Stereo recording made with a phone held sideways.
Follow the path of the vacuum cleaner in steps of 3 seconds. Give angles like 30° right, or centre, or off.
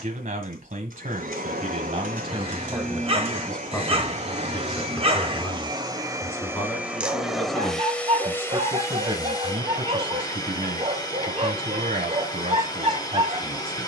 60° right, 40° right, centre, 30° left, 30° left.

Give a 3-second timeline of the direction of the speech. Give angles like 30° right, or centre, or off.
50° right, 10° left, centre, 50° right, 60° right.